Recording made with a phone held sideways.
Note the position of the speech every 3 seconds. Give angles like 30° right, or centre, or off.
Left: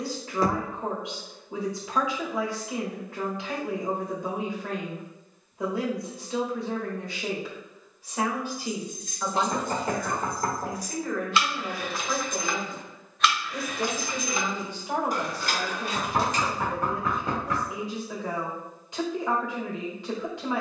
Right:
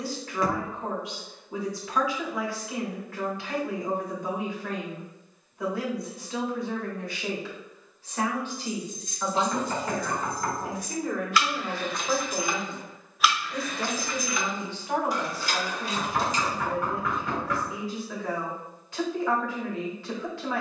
20° left, 20° left, 20° left, 10° right, centre, 20° left, 20° left.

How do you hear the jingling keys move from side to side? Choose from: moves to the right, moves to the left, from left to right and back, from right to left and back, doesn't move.
from left to right and back.